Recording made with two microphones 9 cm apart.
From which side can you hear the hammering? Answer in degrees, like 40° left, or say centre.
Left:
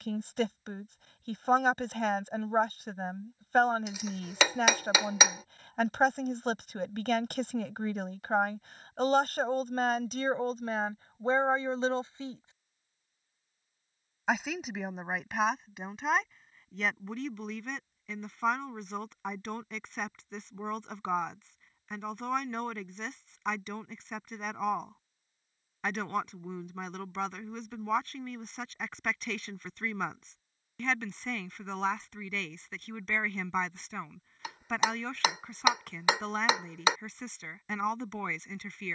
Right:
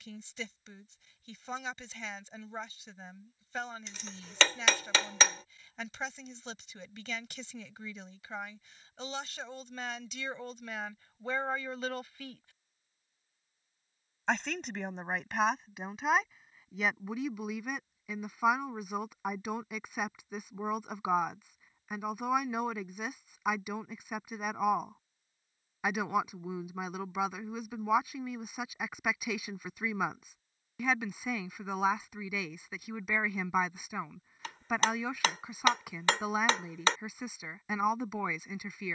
10° left.